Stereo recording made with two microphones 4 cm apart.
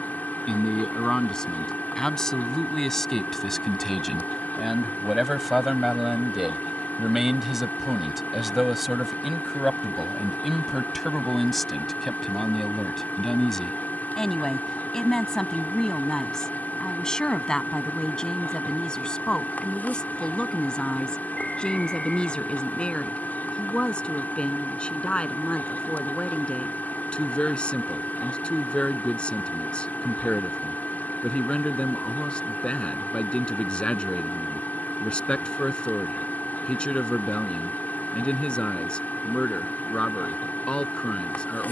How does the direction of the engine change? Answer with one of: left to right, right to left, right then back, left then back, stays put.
stays put.